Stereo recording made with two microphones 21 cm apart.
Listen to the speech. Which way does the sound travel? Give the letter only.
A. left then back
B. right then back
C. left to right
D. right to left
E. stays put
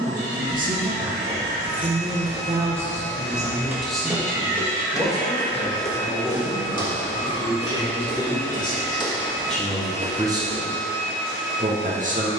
A.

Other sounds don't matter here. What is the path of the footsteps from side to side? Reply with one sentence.
In this clip you hear the footsteps move from right to left and back again.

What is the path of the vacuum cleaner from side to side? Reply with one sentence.
You can hear the vacuum cleaner stay put.